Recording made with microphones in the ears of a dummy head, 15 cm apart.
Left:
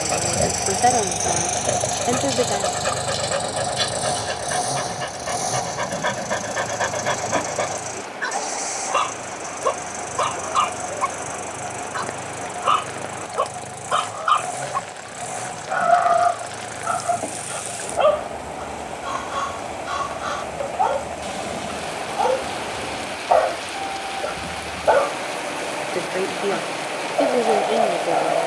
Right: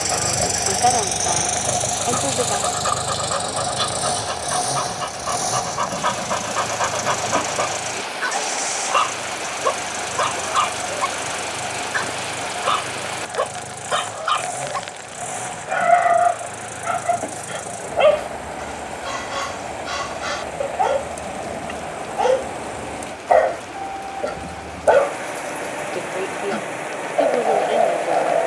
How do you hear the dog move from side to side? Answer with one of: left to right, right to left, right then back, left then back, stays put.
left to right.